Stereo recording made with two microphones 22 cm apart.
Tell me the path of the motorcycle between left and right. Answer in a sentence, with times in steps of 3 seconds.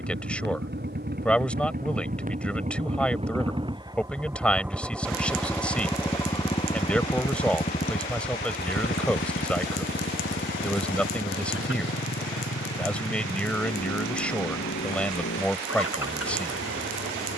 In this clip you hear the motorcycle on the right from 0 s, in the centre from 3 s and on the left from 6 s.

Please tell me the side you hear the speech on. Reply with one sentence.
You can hear the speech in the centre.